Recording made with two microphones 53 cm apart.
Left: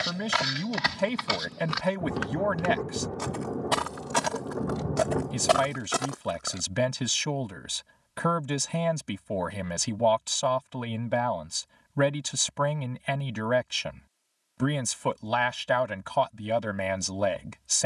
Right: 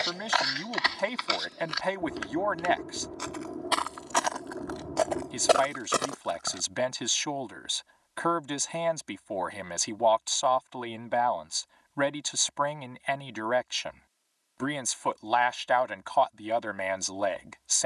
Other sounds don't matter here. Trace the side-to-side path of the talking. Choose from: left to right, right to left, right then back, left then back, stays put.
stays put.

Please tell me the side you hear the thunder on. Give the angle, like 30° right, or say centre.
80° left.